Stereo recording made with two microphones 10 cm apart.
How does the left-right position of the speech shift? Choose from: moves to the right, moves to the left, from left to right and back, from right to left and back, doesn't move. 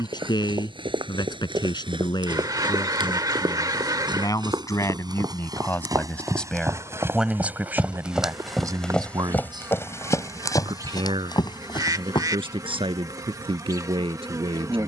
moves to the right.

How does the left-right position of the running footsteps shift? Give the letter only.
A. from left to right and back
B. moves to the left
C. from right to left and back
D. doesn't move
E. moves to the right
B.